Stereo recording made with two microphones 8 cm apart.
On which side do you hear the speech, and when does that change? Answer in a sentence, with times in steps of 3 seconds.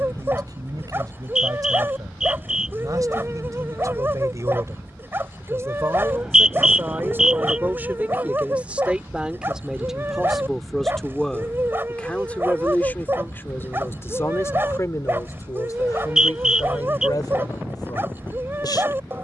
In this clip you hear the speech on the right from 0 s, in the centre from 9 s and on the left from 12 s.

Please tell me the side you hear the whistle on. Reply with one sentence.
You can hear the whistle in the centre.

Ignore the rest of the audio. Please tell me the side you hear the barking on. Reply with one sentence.
In this clip you hear the barking on the right.